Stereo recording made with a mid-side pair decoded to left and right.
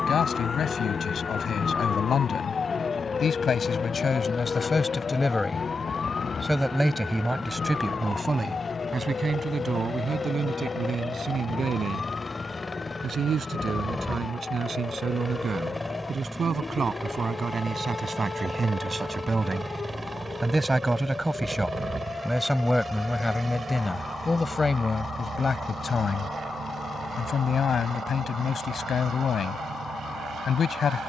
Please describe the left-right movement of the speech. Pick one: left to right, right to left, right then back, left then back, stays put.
right then back.